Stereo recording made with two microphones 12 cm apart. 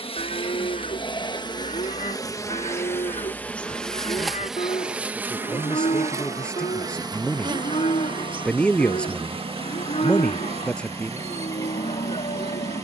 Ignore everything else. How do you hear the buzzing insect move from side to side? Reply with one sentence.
You can hear the buzzing insect move from left to right.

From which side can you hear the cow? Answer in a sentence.
You can hear the cow on the left.